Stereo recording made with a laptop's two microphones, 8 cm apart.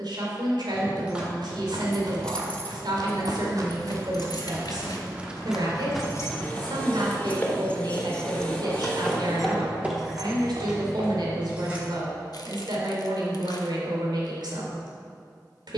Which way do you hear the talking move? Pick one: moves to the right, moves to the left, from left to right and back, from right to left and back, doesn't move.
doesn't move.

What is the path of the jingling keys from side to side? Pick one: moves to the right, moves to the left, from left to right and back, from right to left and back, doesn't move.
from right to left and back.